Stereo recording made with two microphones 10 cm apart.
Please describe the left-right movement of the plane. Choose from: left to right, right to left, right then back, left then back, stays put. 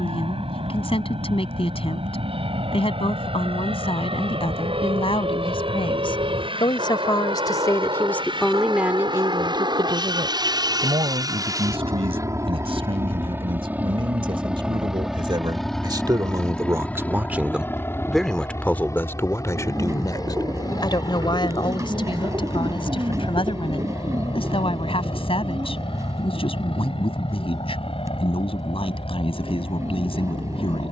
right to left.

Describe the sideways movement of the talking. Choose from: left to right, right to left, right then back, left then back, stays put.
right then back.